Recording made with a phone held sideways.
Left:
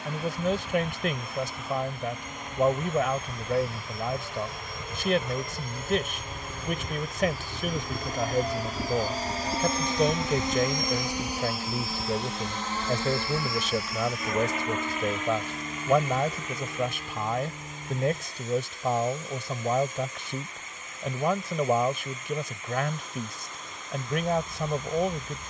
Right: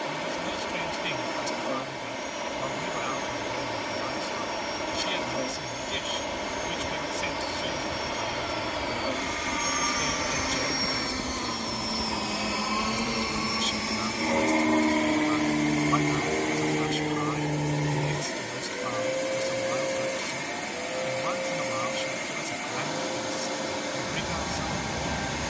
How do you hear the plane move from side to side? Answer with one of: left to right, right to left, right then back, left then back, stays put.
left to right.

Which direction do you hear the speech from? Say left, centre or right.
left.